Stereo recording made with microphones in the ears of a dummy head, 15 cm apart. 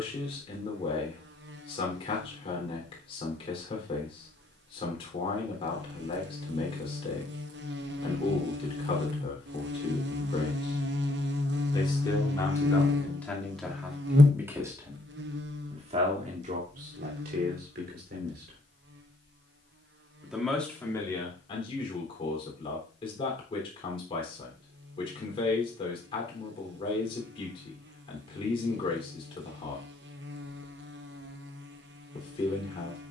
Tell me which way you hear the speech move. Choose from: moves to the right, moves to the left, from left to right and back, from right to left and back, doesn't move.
from left to right and back.